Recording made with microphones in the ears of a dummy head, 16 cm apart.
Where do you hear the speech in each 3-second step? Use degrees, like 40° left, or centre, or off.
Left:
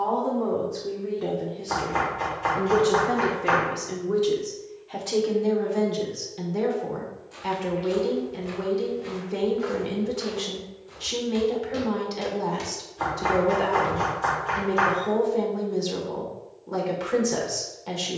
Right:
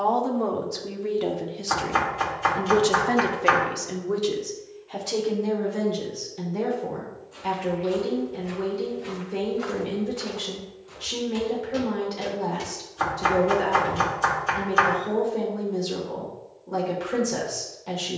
70° right, 10° right, 10° left, 10° left, 10° left, 10° left.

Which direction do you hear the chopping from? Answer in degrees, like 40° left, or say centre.
50° right.